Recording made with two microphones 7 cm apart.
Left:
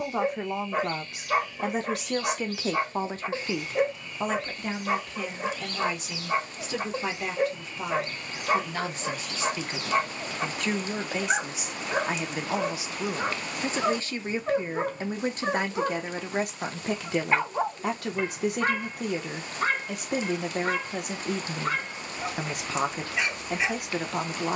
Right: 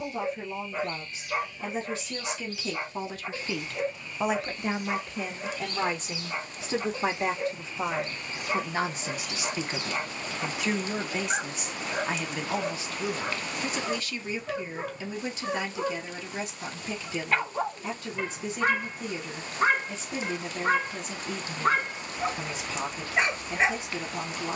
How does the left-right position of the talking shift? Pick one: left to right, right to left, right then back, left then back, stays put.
right then back.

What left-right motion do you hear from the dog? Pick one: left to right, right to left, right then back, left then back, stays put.
left to right.